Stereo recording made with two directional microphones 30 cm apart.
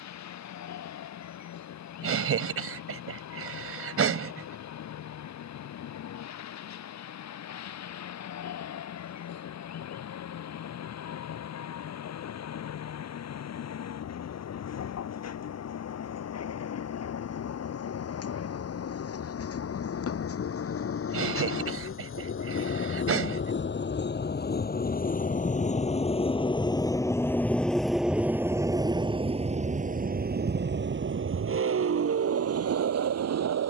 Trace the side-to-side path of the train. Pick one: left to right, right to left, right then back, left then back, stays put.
left to right.